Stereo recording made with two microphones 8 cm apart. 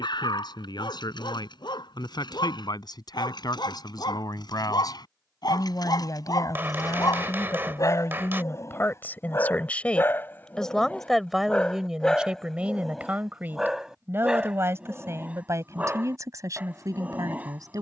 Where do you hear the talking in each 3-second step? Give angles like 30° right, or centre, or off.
70° left, 60° left, 40° left, 10° left, 20° right, 40° right.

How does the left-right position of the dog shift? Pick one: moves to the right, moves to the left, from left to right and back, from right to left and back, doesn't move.
moves to the right.